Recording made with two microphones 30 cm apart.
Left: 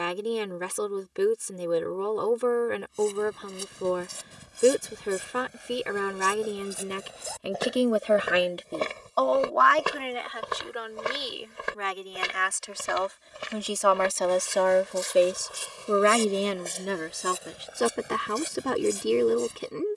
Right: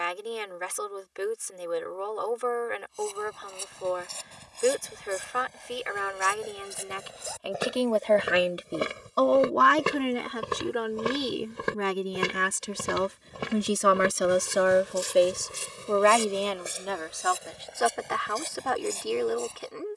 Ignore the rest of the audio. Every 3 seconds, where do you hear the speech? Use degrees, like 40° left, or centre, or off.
50° left, 50° left, 20° left, 50° right, 30° right, 20° left, 40° left.